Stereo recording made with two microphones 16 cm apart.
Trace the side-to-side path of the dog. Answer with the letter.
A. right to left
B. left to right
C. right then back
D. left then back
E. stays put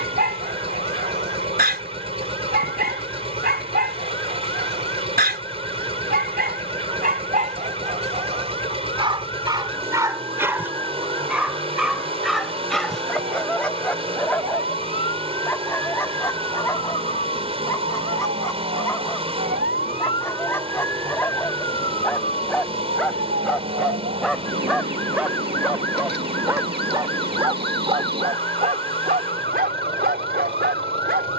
D.